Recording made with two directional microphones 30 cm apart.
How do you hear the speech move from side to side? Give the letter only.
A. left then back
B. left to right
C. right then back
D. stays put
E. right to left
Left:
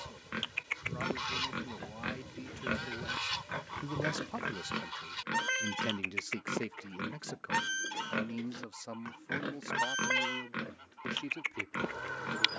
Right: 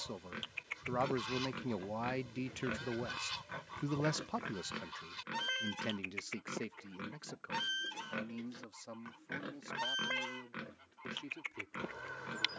E.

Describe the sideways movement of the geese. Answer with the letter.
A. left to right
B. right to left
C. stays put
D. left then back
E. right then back
C.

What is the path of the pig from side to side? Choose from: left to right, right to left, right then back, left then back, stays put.
stays put.